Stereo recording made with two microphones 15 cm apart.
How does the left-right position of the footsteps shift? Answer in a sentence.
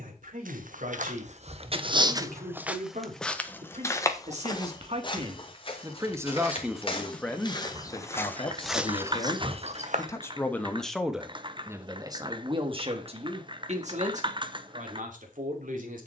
You can hear the footsteps go left and come back.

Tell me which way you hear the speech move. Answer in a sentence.
In this clip you hear the speech move from right to left and back again.